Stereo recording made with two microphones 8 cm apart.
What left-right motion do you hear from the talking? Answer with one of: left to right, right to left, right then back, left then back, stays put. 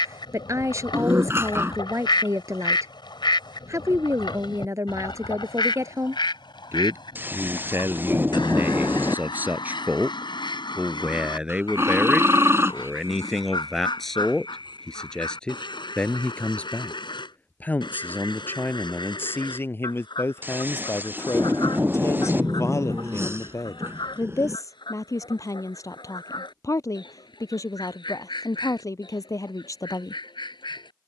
right to left.